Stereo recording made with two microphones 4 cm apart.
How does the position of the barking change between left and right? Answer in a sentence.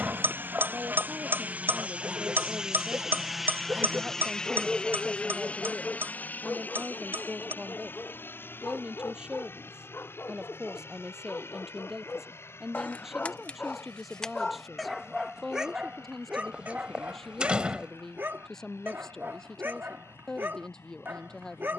In this clip you hear the barking go left and come back.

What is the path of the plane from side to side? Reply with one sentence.
In this clip you hear the plane move to the left.